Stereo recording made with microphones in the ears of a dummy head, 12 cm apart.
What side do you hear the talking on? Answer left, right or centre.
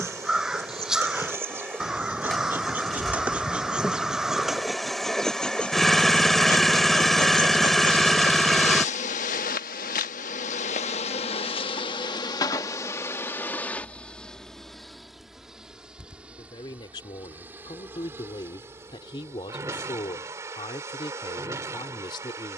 left.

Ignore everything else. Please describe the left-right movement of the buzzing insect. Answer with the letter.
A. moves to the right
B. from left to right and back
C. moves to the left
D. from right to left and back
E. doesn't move
D.